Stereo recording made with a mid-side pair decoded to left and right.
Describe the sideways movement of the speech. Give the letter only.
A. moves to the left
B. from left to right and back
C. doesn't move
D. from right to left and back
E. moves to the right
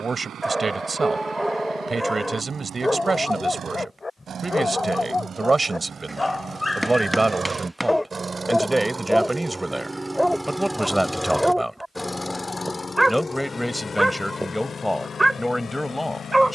A.